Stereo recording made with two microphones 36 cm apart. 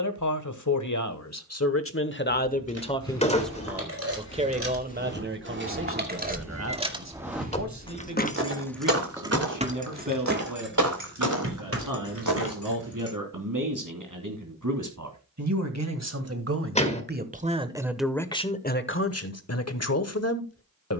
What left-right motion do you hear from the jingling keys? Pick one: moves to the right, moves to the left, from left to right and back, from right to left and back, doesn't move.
from right to left and back.